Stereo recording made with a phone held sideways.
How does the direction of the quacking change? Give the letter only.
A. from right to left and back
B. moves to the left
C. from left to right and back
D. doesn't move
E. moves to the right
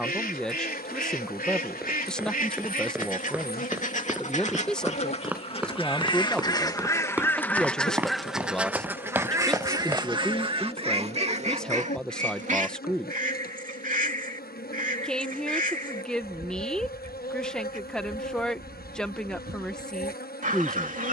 E.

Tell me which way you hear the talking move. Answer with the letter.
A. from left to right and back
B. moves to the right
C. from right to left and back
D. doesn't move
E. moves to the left
D.